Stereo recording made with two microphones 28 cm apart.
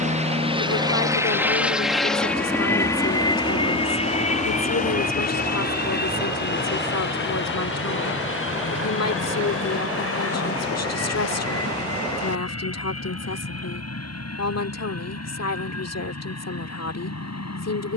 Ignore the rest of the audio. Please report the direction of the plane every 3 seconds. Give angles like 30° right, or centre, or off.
10° right, 20° left, 40° left, 50° left, 50° left, 50° left.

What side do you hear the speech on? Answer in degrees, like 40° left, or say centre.
60° left.